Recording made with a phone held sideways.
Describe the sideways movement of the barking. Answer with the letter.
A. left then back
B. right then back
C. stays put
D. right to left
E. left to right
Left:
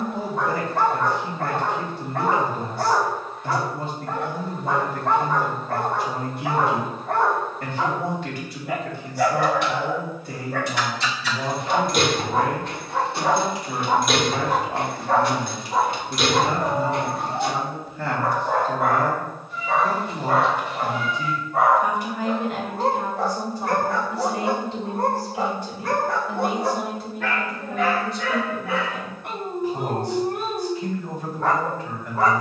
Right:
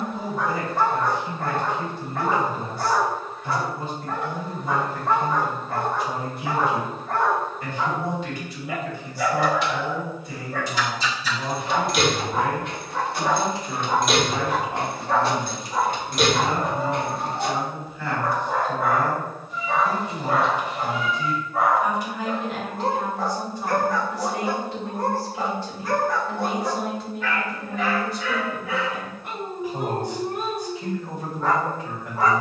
C.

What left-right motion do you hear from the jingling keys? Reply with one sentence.
In this clip you hear the jingling keys travel towards the right.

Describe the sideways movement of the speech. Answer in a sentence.
In this clip you hear the speech travel towards the right.